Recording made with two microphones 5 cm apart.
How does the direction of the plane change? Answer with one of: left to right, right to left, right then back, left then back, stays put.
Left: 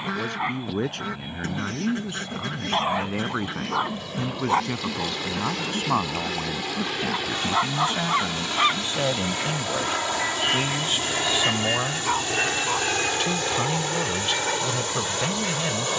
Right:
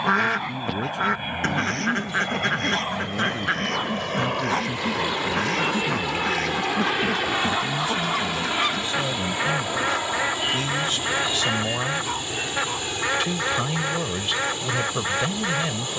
right to left.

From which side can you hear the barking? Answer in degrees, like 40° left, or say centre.
30° left.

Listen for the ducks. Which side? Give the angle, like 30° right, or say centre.
60° right.